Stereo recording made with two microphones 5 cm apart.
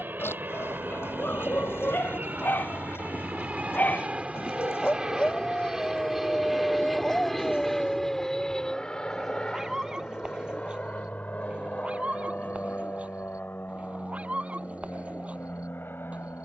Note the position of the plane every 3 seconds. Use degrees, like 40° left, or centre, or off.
50° right, 20° right, centre, 30° left, 40° left, 50° left.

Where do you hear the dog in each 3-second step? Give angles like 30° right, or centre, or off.
50° left, 30° left, 10° left, 20° right, 30° right, 30° right.